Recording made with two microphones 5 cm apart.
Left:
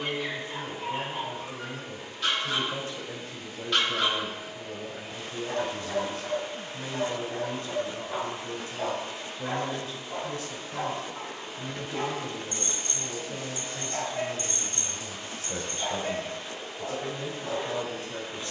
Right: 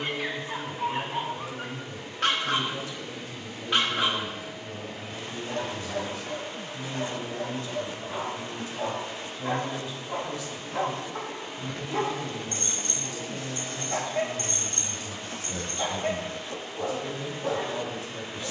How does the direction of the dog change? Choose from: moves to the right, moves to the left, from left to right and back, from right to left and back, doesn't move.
from right to left and back.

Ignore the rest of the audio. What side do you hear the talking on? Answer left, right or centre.
left.